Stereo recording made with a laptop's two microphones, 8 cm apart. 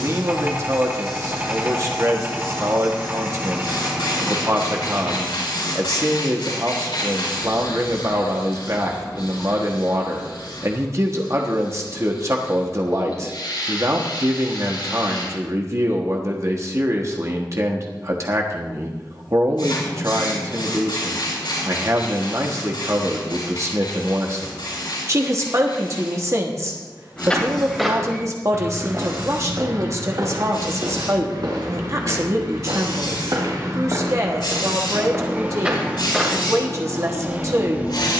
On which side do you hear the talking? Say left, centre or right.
right.